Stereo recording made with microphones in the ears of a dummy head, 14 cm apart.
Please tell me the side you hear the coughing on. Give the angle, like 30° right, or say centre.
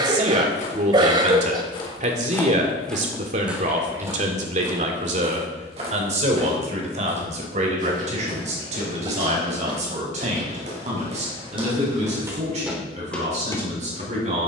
30° right.